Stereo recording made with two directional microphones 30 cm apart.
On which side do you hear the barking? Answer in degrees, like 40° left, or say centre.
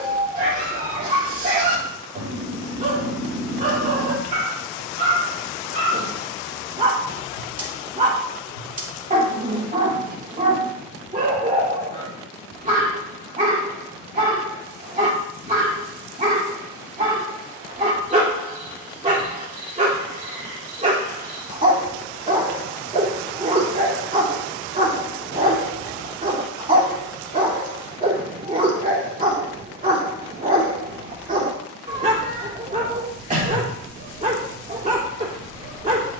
30° right.